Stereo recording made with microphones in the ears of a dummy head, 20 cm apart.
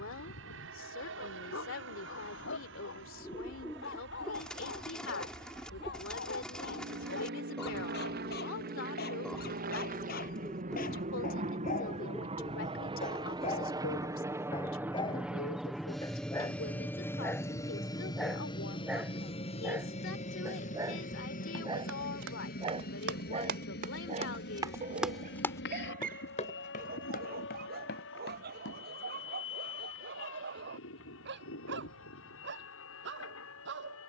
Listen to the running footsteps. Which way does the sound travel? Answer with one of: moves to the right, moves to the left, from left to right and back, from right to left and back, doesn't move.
moves to the left.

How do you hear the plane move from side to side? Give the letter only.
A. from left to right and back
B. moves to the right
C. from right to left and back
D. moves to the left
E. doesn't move
D.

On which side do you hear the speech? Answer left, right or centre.
left.